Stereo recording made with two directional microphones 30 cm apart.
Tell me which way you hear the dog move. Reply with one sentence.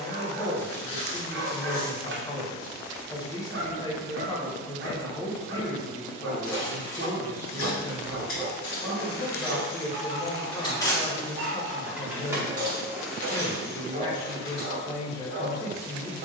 You can hear the dog stay put.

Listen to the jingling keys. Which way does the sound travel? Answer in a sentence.
In this clip you hear the jingling keys go right and come back.